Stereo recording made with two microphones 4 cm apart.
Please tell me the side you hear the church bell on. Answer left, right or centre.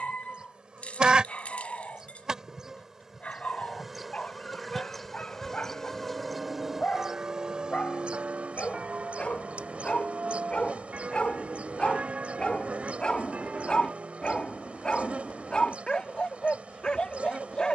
right.